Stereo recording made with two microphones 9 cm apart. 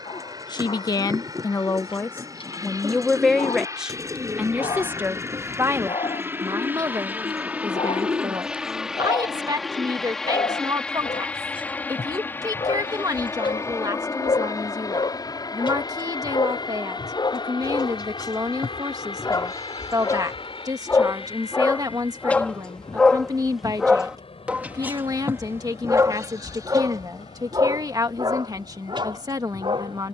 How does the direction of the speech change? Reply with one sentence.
In this clip you hear the speech move from left to right.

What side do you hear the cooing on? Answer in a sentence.
You can hear the cooing on the right.